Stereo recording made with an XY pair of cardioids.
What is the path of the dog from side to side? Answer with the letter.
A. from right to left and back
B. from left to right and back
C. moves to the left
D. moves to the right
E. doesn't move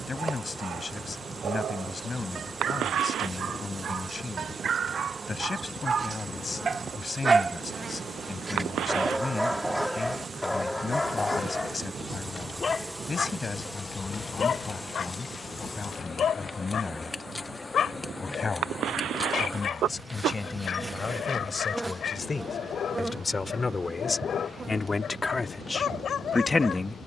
C.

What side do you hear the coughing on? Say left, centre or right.
right.